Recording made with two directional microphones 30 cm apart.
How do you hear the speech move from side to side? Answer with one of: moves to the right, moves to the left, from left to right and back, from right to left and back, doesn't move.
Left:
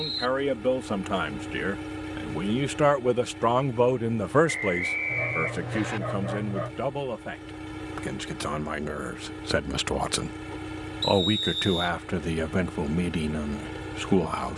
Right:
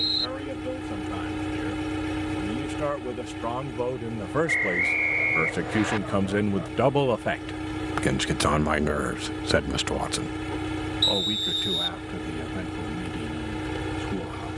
from left to right and back.